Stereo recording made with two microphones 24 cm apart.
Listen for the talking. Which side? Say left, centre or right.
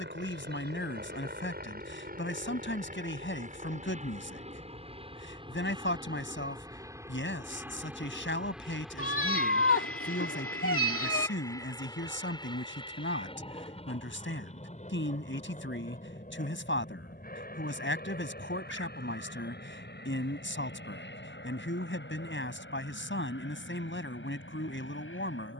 left.